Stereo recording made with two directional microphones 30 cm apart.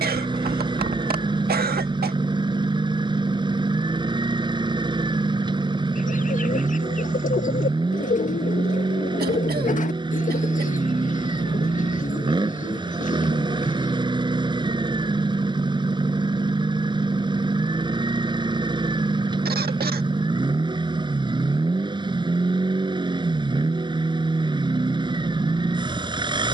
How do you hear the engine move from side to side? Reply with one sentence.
In this clip you hear the engine stay put.